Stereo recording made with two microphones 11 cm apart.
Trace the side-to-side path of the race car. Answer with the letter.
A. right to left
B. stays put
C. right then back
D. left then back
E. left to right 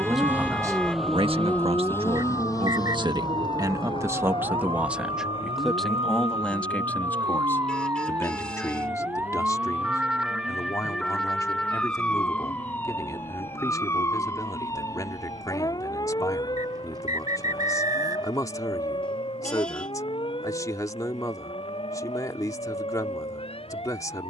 A.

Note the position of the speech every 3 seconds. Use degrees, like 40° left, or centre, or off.
40° right, 20° right, 20° left, 30° left, 30° left, 30° left, 30° left, 30° left.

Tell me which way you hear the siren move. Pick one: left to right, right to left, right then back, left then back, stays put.
right to left.